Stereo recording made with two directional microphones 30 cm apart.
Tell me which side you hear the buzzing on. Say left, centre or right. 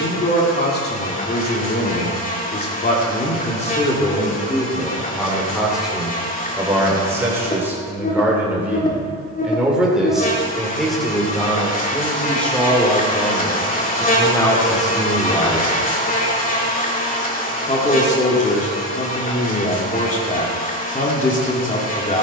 left.